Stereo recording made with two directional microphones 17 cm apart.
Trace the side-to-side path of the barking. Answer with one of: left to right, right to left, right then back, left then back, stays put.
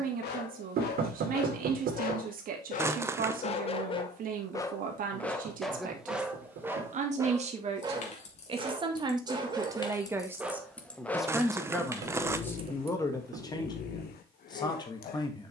right then back.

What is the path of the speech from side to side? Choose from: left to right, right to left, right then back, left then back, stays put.
right to left.